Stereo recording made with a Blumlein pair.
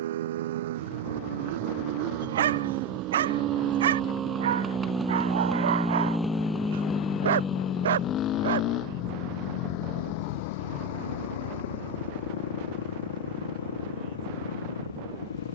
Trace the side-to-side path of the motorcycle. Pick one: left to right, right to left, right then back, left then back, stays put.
right to left.